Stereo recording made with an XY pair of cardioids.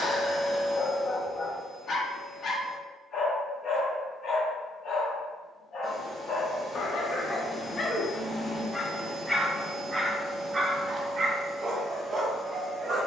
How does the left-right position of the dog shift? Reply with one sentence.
In this clip you hear the dog move to the right.